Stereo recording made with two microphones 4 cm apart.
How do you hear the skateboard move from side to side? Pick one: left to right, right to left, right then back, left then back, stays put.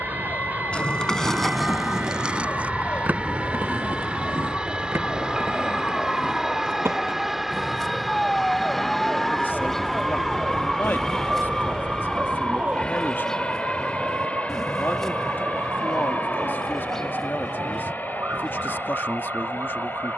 left to right.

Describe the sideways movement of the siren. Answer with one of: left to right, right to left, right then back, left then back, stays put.
left to right.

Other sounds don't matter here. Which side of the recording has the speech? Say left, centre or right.
left.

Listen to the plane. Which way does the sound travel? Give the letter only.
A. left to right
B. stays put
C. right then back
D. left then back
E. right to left
E.